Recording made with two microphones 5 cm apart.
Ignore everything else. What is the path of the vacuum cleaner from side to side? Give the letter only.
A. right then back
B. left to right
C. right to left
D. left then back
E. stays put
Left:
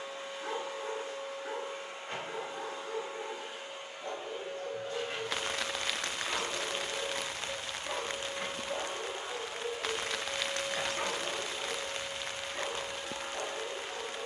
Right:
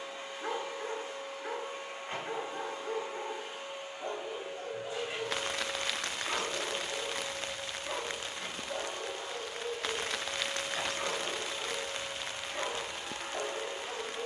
D.